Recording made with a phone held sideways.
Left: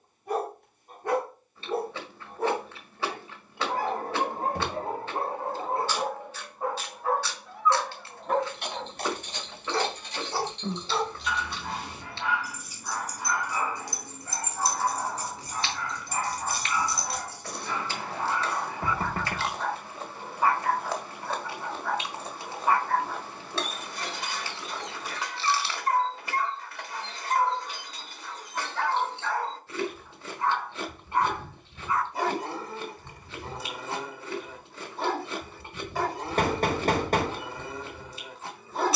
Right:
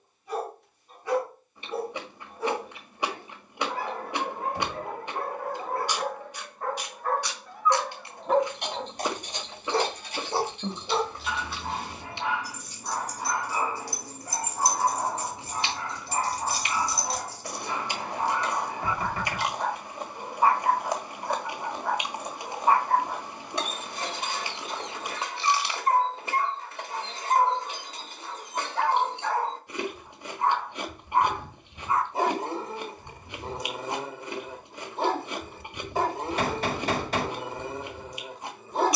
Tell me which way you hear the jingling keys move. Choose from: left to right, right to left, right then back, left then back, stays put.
right to left.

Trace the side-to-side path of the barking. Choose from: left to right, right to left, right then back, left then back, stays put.
left to right.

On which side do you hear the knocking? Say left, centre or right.
left.